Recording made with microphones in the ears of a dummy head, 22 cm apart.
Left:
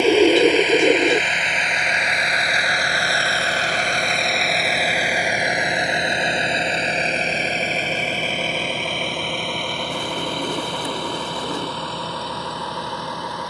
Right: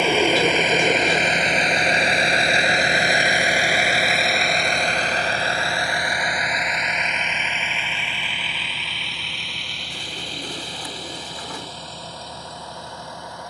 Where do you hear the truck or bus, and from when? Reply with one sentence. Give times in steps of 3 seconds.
In this clip you hear the truck or bus on the right from 0 s, in the centre from 3 s and on the left from 6 s.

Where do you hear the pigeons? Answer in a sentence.
In this clip you hear the pigeons on the left.